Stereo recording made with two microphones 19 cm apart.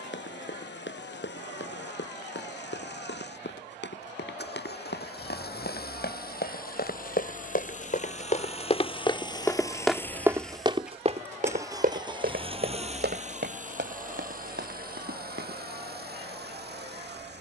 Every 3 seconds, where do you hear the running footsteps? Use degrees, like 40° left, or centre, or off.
80° left, 70° left, 50° left, 20° right, 70° right, 70° right.